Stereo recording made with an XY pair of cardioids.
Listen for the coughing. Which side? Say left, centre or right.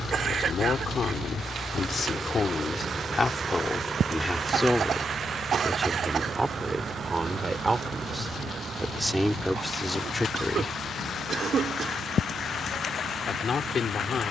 right.